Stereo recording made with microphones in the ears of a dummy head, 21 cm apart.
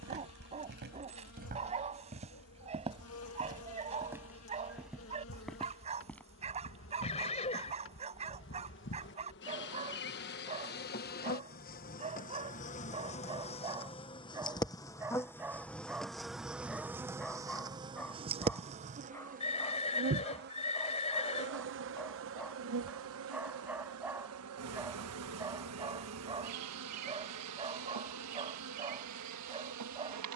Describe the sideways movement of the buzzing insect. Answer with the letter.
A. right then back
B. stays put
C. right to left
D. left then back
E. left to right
E.